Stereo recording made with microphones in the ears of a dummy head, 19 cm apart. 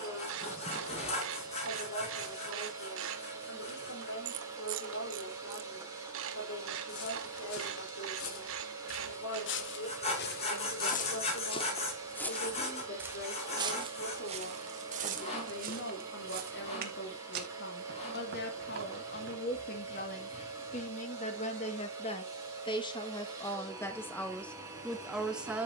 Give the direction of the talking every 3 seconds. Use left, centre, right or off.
left, left, left, left, left, left, left, left, centre.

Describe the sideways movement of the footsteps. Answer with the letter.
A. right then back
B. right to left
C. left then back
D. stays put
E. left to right
E.